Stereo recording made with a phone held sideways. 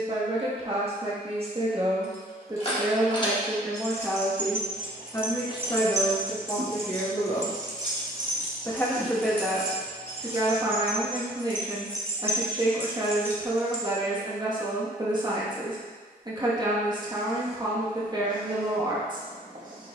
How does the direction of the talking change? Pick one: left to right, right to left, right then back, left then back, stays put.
left then back.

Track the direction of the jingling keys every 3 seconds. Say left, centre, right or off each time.
left, centre, right, right, centre, off, off.